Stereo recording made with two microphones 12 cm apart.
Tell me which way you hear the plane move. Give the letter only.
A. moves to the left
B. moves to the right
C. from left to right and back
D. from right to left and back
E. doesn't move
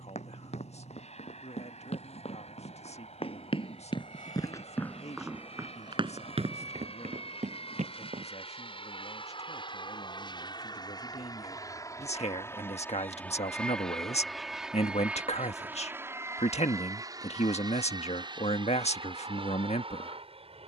B.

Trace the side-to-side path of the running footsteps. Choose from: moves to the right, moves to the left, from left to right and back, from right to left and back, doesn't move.
moves to the right.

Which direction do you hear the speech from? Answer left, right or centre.
left.